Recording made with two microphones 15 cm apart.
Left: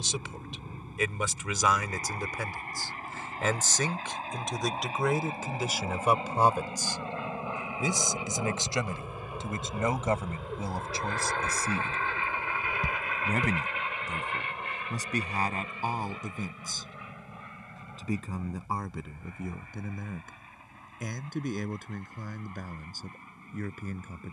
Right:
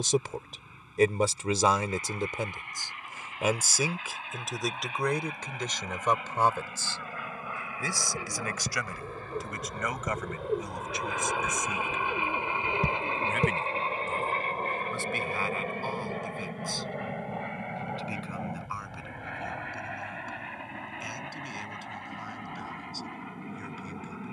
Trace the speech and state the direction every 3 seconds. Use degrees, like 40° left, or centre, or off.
30° right, centre, 20° left, 30° left, 40° left, 40° left, 50° left, 50° left.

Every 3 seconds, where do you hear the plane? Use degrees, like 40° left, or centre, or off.
50° left, 40° left, 30° left, centre, 30° right, 50° right, 70° right, 80° right.